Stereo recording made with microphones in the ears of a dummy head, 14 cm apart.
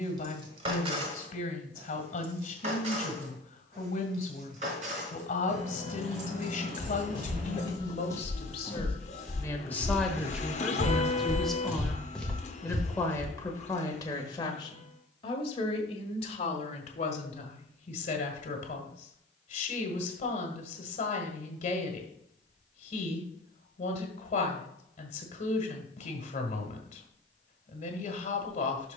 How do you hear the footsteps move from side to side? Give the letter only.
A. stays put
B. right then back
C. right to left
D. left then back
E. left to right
B.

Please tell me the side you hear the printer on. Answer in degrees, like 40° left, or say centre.
40° left.